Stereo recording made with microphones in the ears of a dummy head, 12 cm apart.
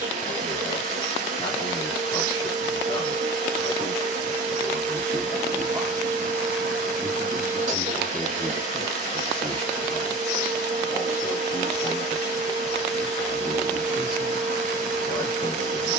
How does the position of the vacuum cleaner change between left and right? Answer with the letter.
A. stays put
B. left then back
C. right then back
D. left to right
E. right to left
A.